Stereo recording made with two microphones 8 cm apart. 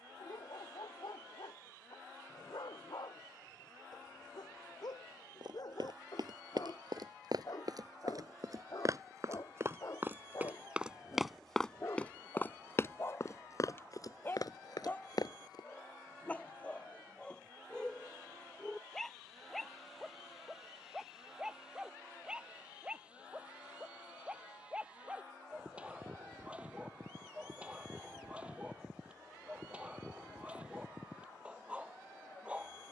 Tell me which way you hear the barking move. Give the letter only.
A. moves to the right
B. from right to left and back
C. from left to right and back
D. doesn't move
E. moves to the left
A.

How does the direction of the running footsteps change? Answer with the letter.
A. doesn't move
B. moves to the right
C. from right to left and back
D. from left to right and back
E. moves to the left
E.